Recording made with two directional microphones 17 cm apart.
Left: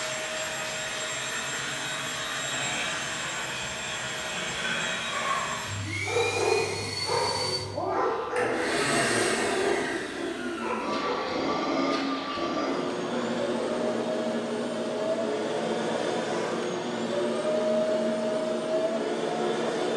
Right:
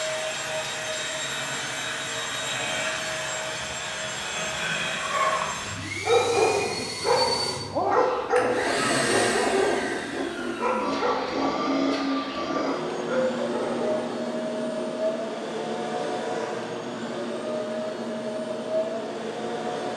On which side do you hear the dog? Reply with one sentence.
You can hear the dog on the right.